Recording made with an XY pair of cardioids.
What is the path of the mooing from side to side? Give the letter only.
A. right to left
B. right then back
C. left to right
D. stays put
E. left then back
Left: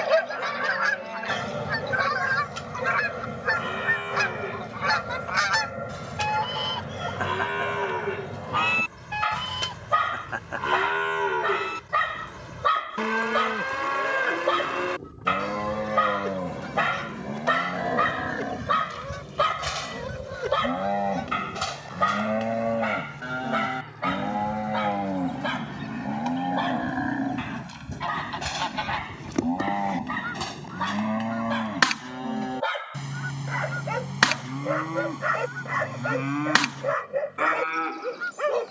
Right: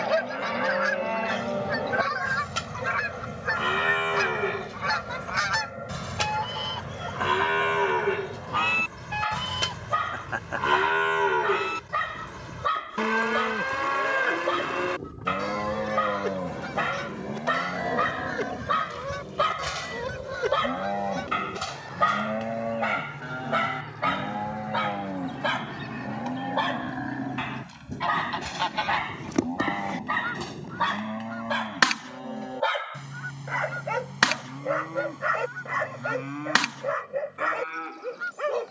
A.